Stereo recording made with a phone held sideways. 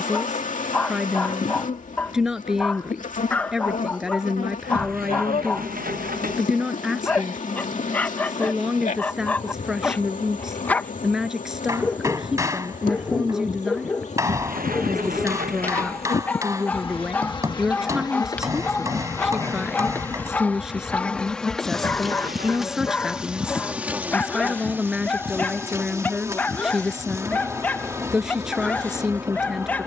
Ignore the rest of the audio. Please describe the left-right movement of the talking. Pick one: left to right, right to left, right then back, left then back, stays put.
stays put.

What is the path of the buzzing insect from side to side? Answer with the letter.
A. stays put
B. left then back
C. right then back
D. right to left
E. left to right
E.